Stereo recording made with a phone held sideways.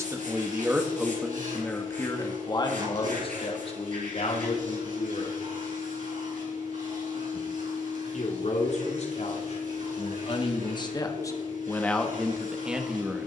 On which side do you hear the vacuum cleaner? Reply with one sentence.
In this clip you hear the vacuum cleaner on the right.